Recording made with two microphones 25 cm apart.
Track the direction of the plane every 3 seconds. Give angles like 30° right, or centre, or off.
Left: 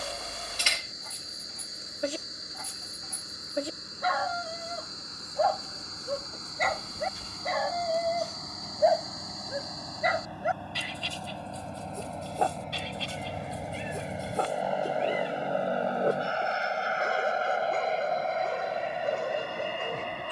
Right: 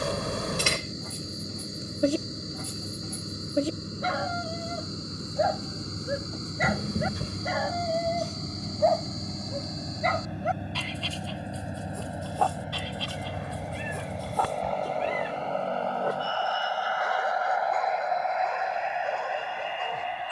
50° right, 50° right, 40° right, 20° right, centre, 20° left, 40° left.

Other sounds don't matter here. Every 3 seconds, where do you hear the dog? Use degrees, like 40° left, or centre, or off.
50° right, 30° right, centre, 20° left, 30° left, 30° left, 40° left.